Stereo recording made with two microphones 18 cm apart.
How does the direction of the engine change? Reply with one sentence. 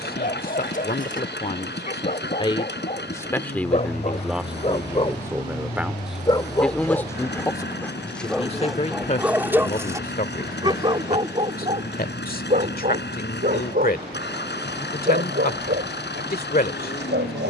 You can hear the engine stay put.